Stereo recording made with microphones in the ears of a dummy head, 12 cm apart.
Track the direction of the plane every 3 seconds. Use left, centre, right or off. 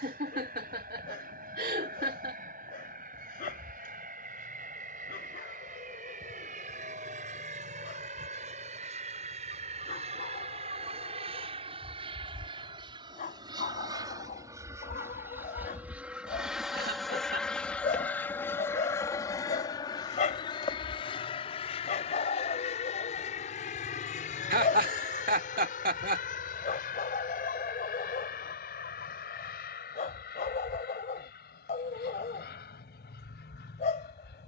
right, right, right, right, right, centre, left, left, left, left, left, left.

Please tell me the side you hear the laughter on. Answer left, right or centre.
right.